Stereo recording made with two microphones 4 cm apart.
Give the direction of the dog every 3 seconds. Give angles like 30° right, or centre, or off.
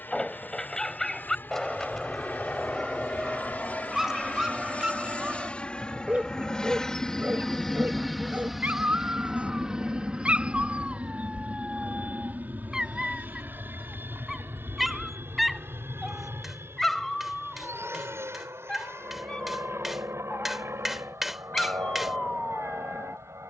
10° left, 10° right, 30° right, 30° right, 10° right, 10° left, 20° left, 20° left.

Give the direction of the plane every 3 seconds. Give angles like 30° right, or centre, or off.
50° left, 30° left, 10° left, 20° right, 50° right, 60° right, 70° right, 70° right.